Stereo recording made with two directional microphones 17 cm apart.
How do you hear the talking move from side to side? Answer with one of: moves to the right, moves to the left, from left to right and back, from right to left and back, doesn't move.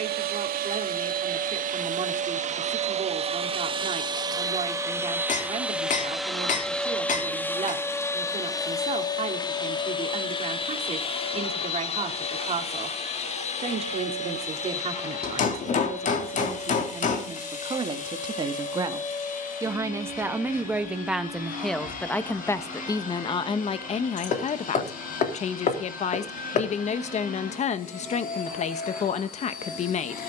moves to the left.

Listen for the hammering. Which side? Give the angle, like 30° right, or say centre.
50° left.